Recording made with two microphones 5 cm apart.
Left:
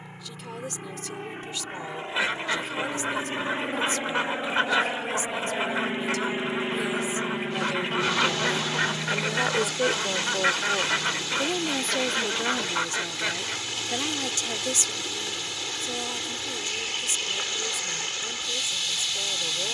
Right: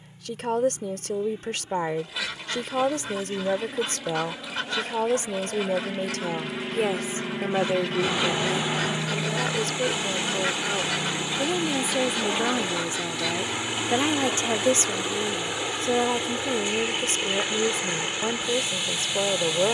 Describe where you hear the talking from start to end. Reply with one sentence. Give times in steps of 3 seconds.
You can hear the talking on the right from 0 s, in the centre from 9 s and on the right from 12 s.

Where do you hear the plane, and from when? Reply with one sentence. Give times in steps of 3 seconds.
You can hear the plane on the left from 0 s, in the centre from 6 s and on the right from 9 s.